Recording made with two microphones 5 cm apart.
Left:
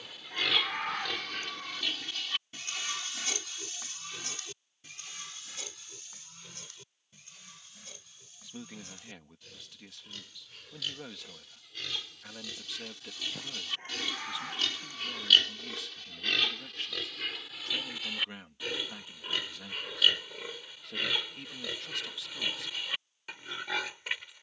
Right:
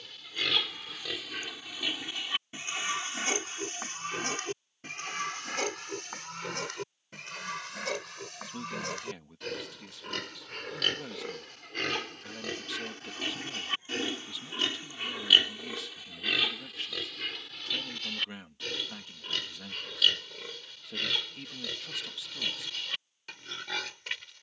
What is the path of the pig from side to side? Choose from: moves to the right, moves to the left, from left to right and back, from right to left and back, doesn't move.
from left to right and back.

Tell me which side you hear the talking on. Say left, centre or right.
centre.